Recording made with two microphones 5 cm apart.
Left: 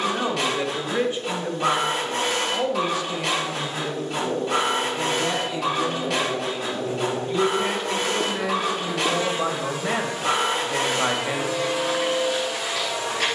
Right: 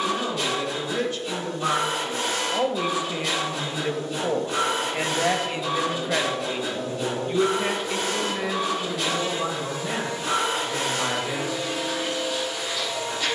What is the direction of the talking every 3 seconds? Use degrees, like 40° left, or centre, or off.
10° left, 40° right, 10° right, 30° left, off.